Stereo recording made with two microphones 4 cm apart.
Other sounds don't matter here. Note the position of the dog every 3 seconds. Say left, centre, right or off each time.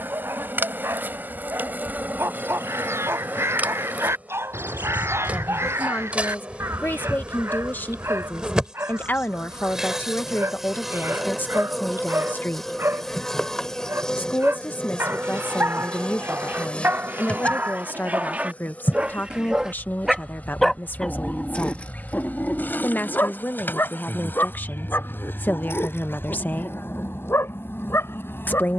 right, right, right, right, right, right, right, left, left, left.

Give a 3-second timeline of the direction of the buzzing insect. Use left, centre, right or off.
right, right, right, centre, centre, left, left, left, left, left.